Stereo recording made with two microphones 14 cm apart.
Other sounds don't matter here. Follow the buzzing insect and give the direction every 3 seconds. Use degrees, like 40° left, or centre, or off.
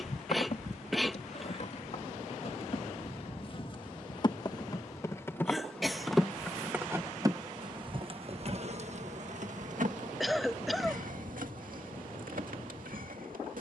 50° left, 30° left, 30° right, 70° right, 80° right.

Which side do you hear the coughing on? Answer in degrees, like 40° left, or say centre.
centre.